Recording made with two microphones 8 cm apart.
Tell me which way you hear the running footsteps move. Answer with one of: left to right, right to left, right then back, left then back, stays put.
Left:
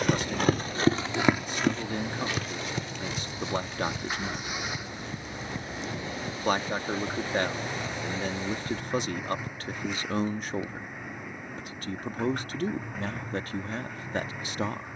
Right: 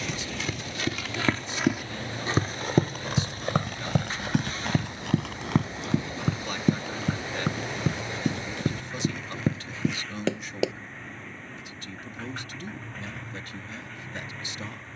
left to right.